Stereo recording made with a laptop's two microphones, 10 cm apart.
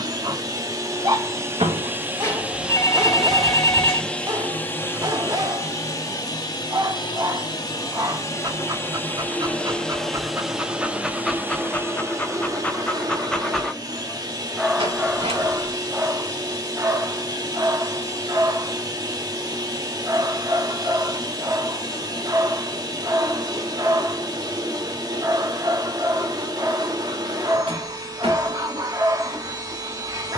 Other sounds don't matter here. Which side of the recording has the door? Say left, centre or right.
right.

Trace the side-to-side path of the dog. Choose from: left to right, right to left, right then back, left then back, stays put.
left then back.